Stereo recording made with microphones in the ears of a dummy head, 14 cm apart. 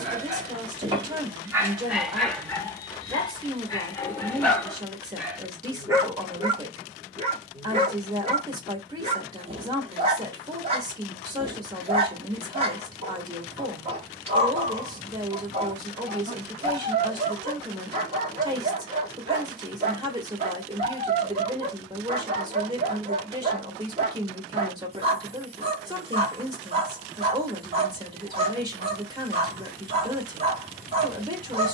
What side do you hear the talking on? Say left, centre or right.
right.